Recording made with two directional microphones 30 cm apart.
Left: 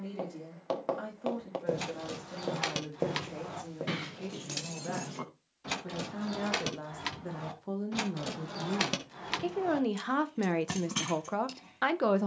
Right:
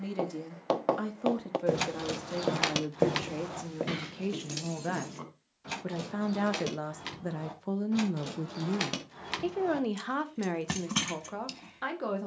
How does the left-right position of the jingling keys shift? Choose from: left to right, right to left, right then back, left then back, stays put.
left then back.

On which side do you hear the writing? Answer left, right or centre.
right.